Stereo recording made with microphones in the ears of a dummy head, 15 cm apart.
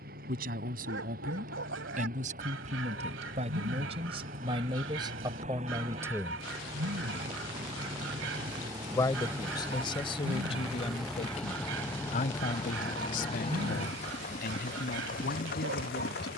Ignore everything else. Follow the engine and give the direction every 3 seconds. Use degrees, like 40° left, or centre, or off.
50° right, 40° right, 30° right, 10° right, 30° left, 50° left.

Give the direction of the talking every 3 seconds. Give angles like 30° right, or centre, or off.
50° right, 30° right, 10° right, 30° left, 50° left, 60° left.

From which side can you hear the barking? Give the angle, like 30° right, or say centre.
80° right.